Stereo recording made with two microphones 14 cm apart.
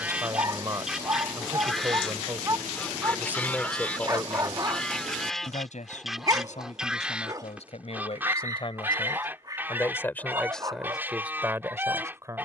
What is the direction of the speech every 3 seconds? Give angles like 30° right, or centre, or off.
20° right, 20° left, 50° left, centre.